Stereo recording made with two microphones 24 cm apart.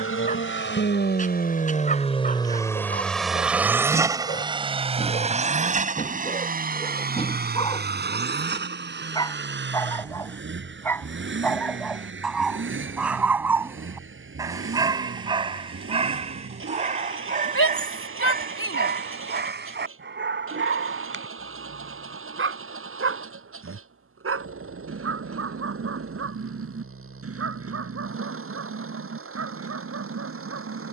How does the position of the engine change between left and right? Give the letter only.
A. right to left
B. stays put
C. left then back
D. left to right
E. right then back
D.